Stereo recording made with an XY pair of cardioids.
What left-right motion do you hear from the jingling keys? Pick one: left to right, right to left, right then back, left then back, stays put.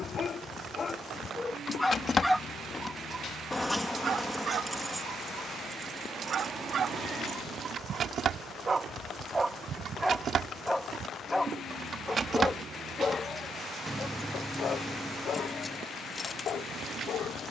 right then back.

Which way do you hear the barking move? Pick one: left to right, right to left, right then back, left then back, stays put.
right then back.